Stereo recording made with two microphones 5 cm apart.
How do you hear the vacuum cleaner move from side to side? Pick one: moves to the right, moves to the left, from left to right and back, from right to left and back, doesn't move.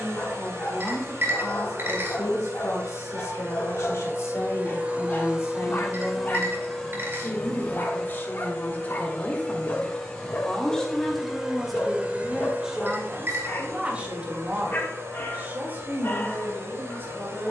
from right to left and back.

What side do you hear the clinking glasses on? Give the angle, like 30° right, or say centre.
50° right.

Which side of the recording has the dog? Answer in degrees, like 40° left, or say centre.
40° left.